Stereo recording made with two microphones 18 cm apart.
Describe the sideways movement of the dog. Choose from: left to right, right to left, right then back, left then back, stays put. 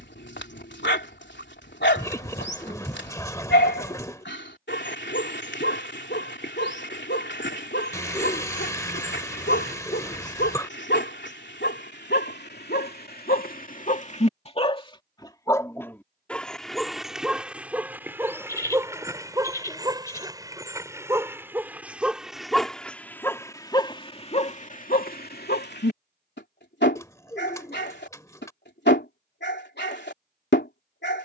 right then back.